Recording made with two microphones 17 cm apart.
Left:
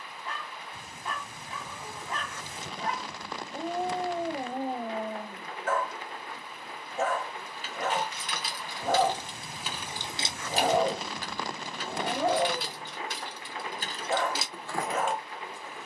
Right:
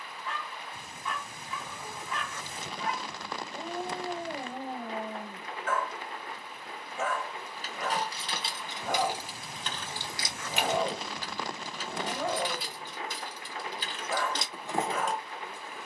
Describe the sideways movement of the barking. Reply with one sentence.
You can hear the barking stay put.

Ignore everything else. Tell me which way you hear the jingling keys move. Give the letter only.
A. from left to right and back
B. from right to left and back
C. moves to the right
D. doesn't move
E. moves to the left
B.